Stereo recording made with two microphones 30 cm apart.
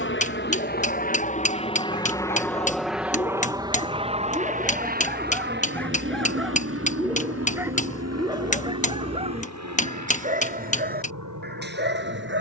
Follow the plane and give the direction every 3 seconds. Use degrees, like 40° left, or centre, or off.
20° left, 20° right, 50° right, 60° right.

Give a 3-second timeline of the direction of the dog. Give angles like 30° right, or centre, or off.
30° left, 10° left, 10° right, 30° right.